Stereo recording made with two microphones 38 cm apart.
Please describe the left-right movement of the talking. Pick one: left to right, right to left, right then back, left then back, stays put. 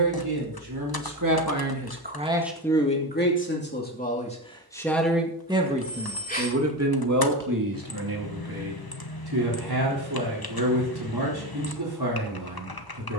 left then back.